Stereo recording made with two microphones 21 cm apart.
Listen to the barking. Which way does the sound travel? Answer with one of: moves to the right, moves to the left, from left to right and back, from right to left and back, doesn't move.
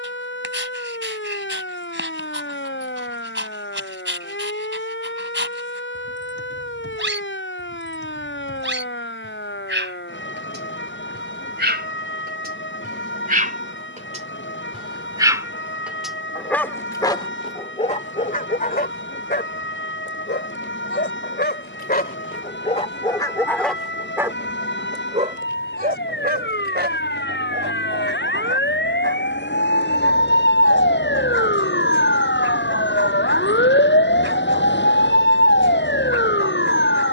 from right to left and back.